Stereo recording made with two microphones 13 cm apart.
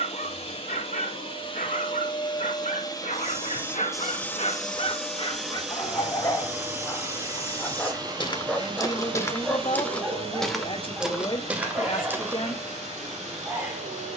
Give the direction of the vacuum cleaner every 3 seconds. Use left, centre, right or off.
left, centre, right, right, right.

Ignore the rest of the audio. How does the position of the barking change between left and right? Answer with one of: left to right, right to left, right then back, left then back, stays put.
left to right.